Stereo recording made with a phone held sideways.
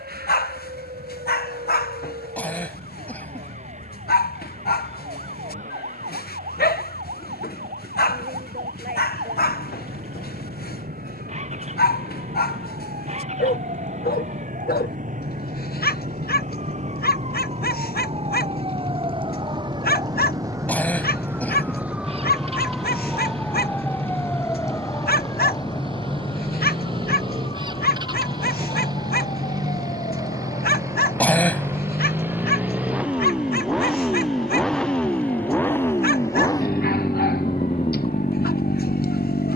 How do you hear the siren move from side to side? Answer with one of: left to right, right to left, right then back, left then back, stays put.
right to left.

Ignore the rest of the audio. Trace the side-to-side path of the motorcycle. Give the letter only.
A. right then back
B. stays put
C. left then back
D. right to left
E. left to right
D.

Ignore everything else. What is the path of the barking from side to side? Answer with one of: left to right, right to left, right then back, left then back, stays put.
stays put.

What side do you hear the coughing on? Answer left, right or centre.
centre.